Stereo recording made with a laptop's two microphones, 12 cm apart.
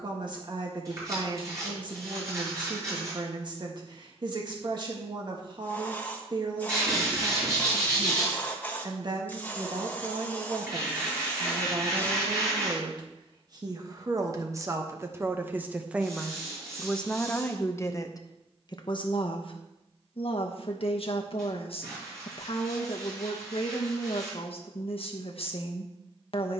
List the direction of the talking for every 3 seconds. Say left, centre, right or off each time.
right, right, right, right, right, centre, left, left, left.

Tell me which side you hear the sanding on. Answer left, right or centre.
right.